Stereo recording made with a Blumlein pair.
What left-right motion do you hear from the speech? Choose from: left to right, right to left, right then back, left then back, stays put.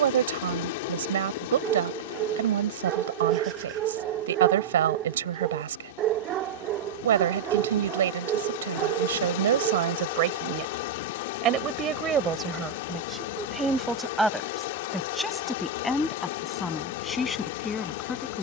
right to left.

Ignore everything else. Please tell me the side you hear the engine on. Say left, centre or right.
left.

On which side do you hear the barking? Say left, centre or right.
right.